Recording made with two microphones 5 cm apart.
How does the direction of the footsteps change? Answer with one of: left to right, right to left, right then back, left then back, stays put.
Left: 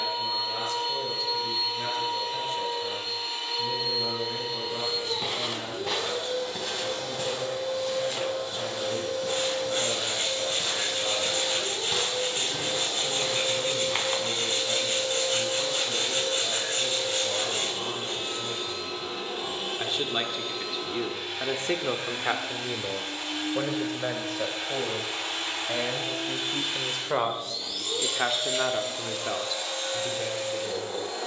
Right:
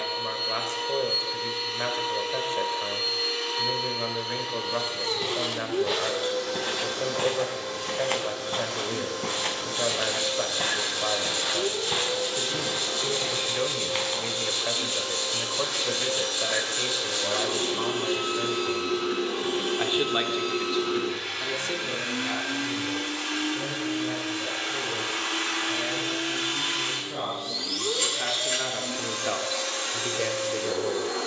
right then back.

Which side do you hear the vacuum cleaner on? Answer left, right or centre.
right.